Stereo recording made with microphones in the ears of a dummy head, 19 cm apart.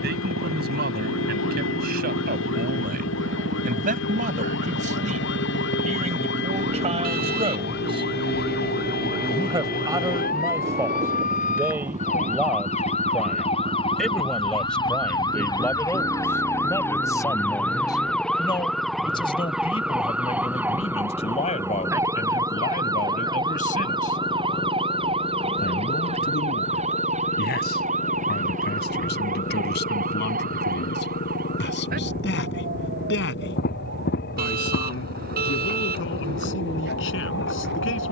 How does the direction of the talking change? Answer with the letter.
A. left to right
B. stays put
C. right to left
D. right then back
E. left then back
C.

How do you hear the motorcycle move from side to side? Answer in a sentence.
In this clip you hear the motorcycle go from the right side to the left.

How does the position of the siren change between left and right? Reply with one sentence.
You can hear the siren go from the left side to the right.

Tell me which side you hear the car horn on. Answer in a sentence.
You can hear the car horn on the right.